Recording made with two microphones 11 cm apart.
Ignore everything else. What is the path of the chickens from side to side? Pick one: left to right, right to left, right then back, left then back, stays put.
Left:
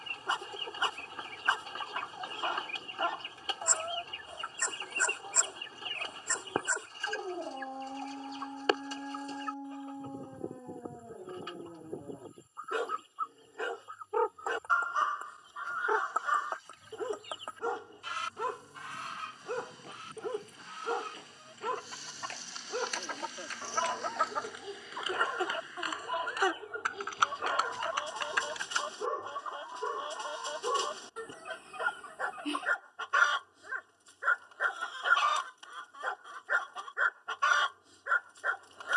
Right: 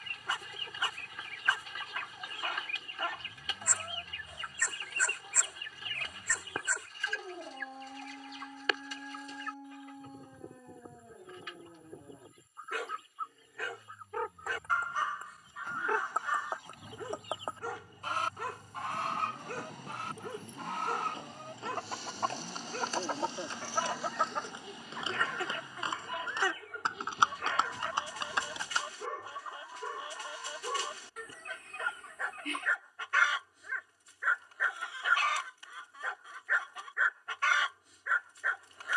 right then back.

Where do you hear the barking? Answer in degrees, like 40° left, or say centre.
30° left.